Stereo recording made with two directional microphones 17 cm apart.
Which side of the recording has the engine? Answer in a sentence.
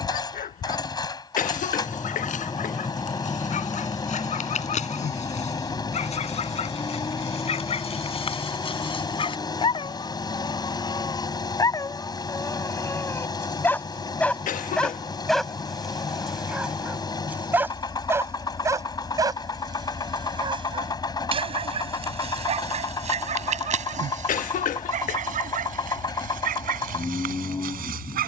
You can hear the engine on the left.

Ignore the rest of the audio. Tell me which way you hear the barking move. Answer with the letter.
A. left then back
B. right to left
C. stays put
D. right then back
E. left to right
E.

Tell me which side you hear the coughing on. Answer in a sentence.
In this clip you hear the coughing on the left.